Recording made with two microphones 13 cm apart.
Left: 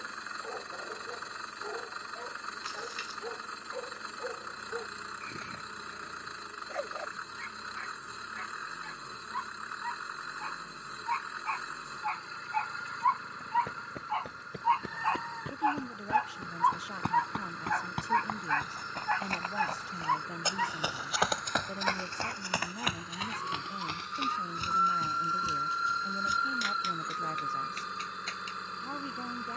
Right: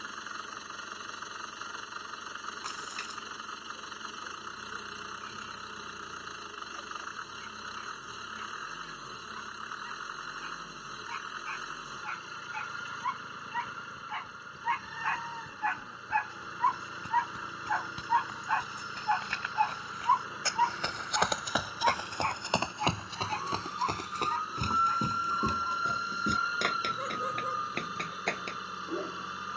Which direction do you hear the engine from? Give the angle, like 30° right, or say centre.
10° right.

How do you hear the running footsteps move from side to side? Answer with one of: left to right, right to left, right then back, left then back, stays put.
left to right.